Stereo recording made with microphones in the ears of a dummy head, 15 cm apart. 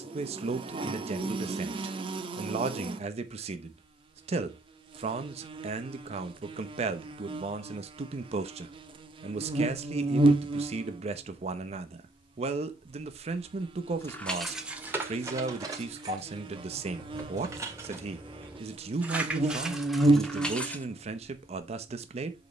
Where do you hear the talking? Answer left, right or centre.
right.